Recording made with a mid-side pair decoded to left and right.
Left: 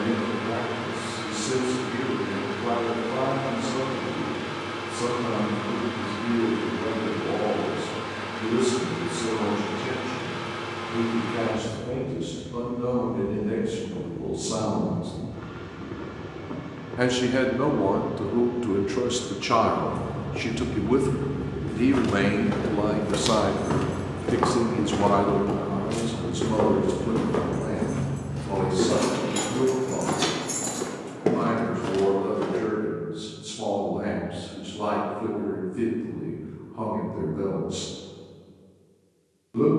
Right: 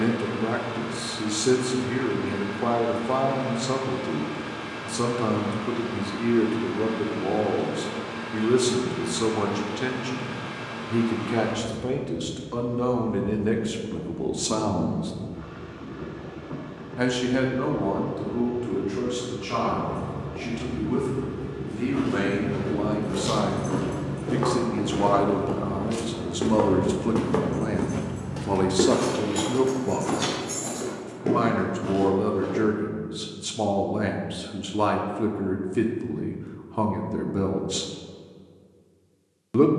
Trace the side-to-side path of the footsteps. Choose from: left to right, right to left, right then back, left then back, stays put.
right then back.